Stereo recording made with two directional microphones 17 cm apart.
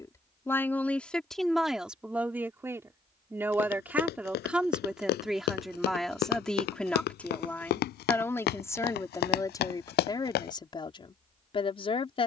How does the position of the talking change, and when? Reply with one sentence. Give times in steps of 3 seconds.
In this clip you hear the talking in the centre from 0 s and on the left from 9 s.